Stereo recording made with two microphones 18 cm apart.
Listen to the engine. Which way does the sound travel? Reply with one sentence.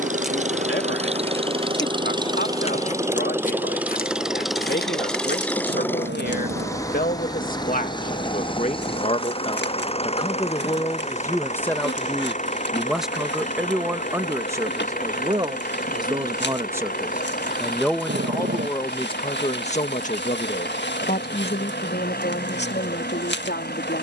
You can hear the engine go from the right side to the left.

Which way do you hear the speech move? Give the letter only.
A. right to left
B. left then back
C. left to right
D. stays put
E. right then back
E.